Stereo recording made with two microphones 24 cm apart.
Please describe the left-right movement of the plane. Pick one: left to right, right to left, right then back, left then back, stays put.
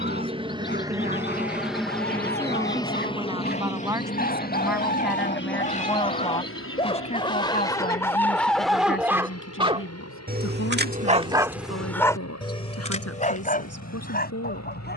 right to left.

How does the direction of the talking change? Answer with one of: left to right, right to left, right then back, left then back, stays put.
right to left.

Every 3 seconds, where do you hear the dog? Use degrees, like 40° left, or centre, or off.
40° left, 40° left, 10° left, 20° right, 30° left.